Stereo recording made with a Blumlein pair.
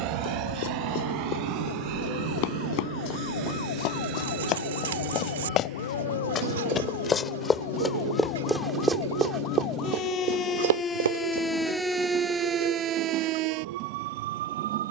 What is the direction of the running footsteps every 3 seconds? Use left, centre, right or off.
left, left, centre, right, off.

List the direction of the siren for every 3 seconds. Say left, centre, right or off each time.
left, left, left, left, right.